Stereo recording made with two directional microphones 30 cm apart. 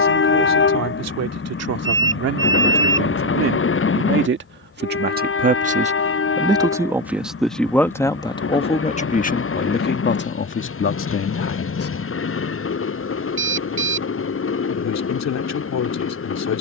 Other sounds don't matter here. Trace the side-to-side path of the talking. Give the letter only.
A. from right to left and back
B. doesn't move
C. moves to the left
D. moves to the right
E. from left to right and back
C.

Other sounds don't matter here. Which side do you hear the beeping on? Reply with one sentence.
In this clip you hear the beeping on the right.